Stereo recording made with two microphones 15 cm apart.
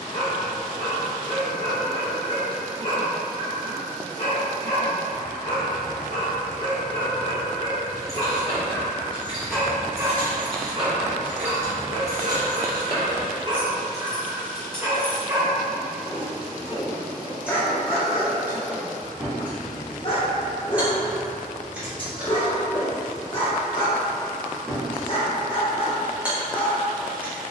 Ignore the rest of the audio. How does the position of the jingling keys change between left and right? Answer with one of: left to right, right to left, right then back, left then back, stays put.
right then back.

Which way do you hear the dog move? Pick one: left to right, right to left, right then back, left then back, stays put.
right then back.